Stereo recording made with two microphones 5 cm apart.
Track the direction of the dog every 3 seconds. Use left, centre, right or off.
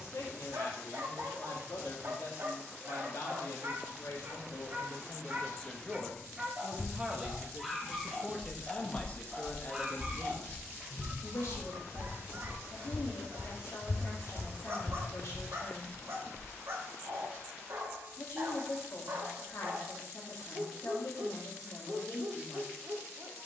right, right, centre, right, right, right, right, right.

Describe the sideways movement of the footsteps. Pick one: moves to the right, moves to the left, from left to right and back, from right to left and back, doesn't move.
moves to the left.